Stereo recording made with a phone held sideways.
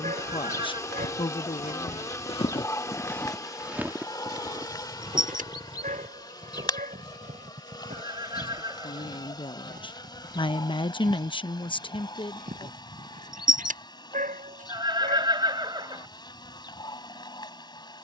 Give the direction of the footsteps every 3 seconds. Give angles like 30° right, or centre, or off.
50° left, 20° right, 60° right, 60° right, 70° right, off.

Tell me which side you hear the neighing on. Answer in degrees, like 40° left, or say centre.
30° right.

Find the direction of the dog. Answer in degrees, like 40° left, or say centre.
70° right.